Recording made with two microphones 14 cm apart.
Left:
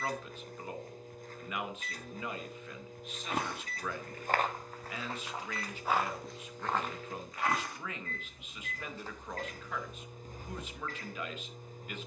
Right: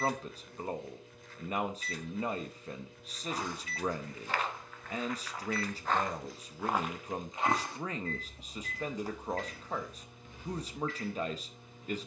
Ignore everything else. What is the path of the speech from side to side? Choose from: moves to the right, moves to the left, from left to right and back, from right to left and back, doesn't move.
doesn't move.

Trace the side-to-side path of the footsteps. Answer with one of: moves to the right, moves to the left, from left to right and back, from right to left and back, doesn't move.
from left to right and back.